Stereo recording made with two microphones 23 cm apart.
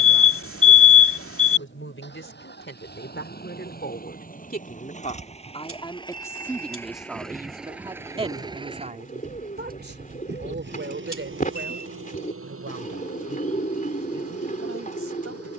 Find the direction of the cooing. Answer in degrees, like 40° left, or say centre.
30° left.